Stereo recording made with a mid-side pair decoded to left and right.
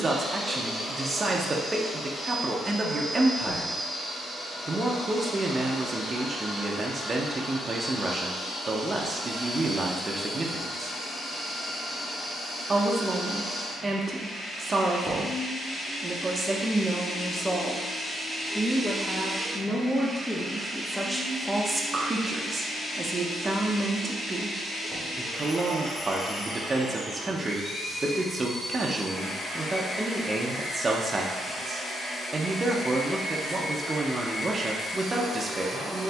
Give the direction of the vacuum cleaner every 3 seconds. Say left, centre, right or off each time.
left, left, left, left, left, left, centre, left, left, left, left, left.